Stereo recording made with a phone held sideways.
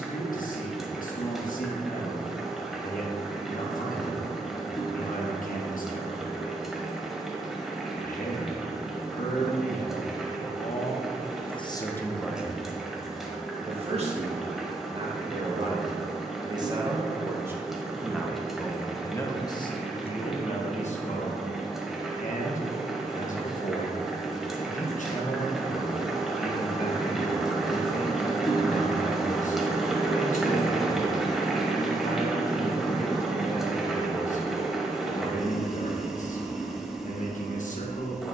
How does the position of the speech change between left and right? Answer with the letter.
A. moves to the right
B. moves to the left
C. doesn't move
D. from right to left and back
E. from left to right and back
E.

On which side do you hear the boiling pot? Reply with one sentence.
You can hear the boiling pot in the centre.